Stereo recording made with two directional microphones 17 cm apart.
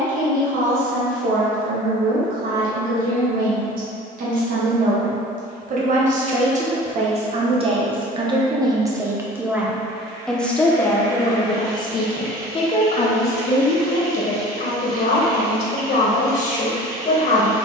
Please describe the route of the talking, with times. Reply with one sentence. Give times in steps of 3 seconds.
You can hear the talking on the right from 0 s, in the centre from 9 s and on the left from 12 s.